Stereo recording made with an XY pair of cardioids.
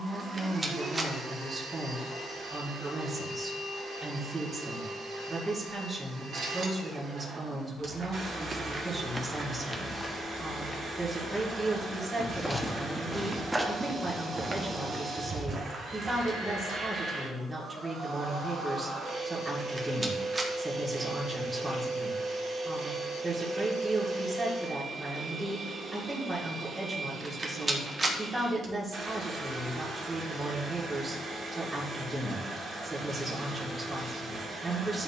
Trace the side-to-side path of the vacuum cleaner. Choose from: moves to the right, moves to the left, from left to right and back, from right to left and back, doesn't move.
doesn't move.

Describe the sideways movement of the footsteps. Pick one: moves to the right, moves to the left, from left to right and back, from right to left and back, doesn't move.
from right to left and back.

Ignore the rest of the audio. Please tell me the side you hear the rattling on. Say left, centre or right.
right.